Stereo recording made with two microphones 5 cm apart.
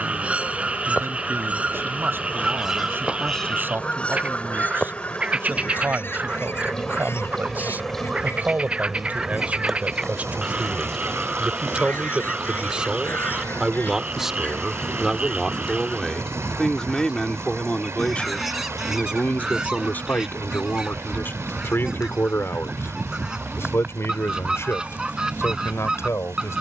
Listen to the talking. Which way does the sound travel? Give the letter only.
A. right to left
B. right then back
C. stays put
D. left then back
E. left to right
A.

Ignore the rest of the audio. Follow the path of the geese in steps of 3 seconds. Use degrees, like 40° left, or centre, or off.
20° right, 30° left, 60° left, 60° left, 40° left, 20° left, 10° right, 10° right, 10° right.